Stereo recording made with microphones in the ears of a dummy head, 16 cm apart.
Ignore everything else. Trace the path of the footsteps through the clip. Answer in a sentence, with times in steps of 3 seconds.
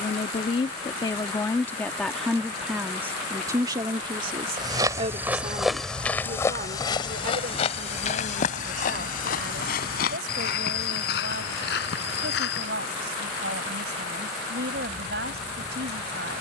In this clip you hear the footsteps not at all from 0 s, in the centre from 3 s, on the left from 6 s and not at all from 15 s.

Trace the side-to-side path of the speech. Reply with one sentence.
You can hear the speech travel towards the right.